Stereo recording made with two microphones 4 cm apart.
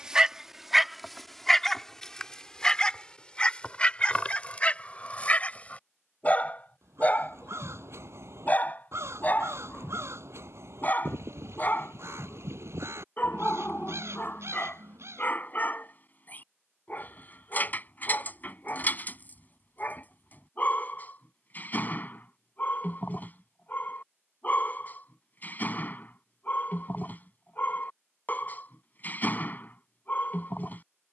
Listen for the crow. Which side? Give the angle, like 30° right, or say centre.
70° right.